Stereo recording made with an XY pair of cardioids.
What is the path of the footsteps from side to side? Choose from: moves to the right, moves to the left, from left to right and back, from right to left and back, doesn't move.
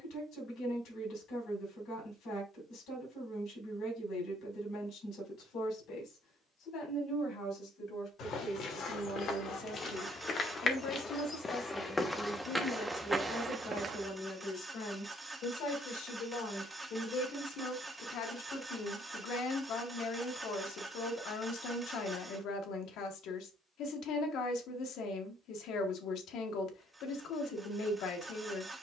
moves to the right.